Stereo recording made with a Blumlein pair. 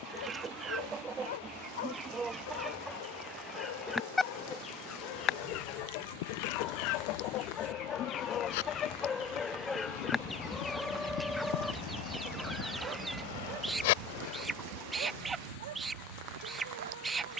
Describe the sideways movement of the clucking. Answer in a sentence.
You can hear the clucking go left and come back.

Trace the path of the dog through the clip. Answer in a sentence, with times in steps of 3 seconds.
You can hear the dog on the left from 0 s, in the centre from 9 s and on the right from 12 s.